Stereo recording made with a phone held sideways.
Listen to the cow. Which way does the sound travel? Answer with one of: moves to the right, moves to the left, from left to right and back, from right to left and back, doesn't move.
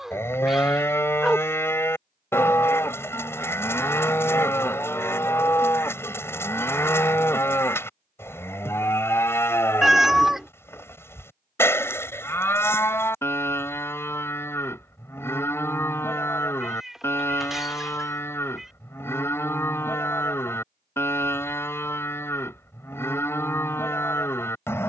doesn't move.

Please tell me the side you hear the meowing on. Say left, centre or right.
centre.